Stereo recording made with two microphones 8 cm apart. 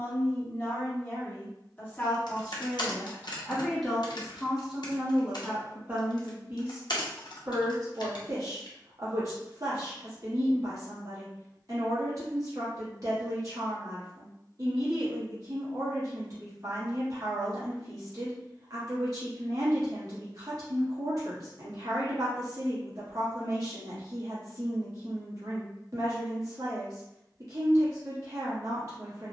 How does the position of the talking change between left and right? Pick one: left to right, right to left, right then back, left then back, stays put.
left to right.